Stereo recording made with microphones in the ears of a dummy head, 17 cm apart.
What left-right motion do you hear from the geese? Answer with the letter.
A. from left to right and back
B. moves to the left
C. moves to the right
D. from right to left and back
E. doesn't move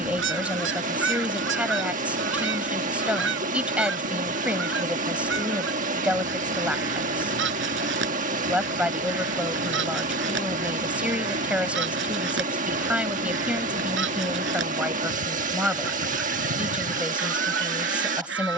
E.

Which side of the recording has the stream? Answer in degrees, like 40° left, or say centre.
40° right.